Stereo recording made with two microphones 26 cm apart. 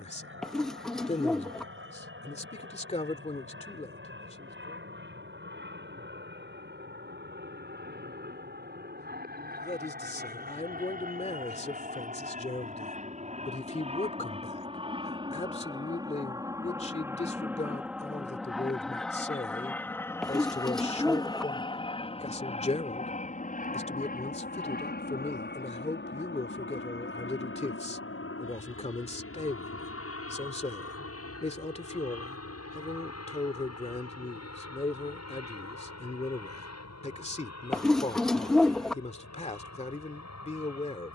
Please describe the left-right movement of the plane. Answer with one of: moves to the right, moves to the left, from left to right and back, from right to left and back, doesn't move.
moves to the left.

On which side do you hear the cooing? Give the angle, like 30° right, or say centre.
centre.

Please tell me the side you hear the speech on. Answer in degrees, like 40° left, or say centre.
30° left.